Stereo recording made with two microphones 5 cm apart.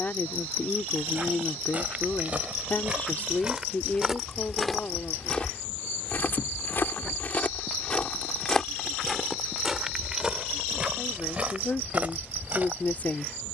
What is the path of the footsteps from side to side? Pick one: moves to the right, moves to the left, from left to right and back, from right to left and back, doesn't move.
from right to left and back.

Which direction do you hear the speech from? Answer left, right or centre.
left.